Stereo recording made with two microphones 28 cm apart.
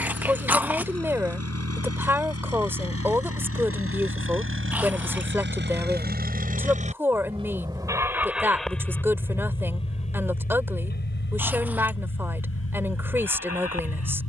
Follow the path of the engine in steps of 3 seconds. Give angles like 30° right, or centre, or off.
60° right, 50° right, 20° right, 30° left, 60° left.